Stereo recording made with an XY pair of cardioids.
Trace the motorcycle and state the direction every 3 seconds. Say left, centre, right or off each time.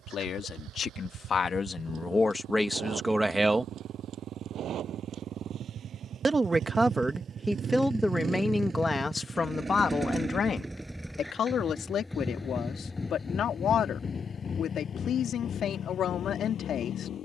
right, right, right, centre, left, left.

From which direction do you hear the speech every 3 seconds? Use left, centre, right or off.
left, centre, centre, left, left, left.